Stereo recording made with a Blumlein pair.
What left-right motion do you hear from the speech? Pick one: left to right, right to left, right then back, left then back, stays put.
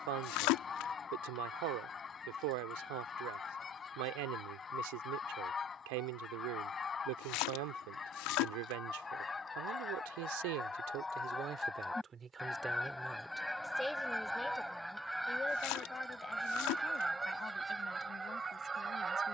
right to left.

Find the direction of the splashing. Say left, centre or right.
left.